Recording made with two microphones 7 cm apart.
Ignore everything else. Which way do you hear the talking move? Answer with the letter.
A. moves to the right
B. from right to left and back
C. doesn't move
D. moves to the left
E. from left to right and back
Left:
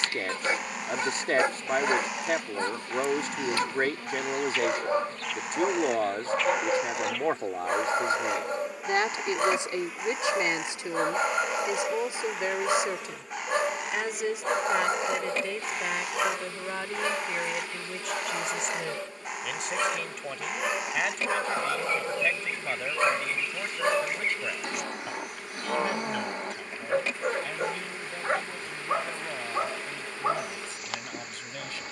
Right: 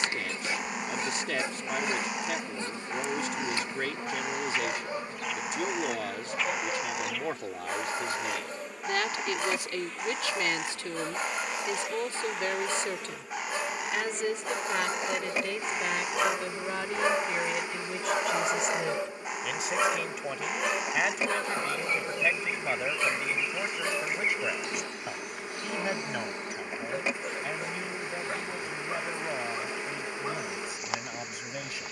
A.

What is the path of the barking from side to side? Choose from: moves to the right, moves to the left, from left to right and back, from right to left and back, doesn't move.
from left to right and back.